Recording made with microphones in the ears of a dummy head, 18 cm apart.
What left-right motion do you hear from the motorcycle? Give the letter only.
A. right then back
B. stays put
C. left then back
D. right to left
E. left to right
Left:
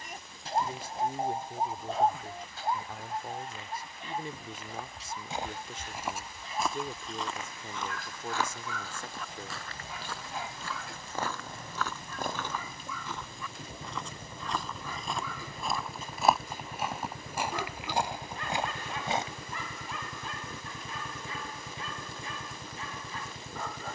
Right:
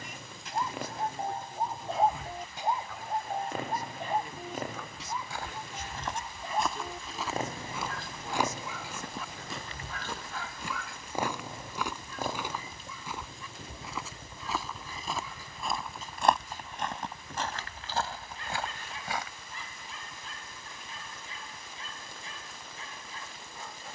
D.